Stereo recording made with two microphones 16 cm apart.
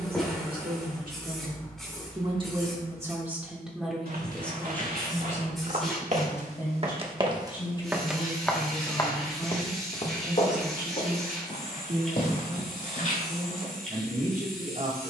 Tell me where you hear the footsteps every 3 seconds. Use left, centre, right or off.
off, right, right, left, left.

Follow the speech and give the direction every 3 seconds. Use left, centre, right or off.
right, centre, left, right, right.